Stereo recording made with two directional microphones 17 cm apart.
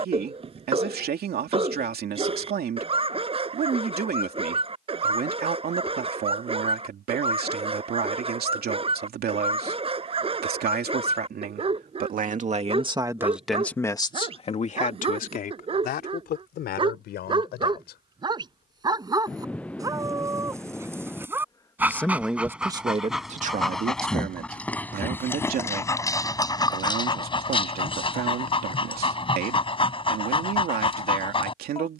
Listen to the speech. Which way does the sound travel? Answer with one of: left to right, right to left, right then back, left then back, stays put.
left then back.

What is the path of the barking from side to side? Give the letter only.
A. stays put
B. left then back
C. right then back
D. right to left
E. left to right
D.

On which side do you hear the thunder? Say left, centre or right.
centre.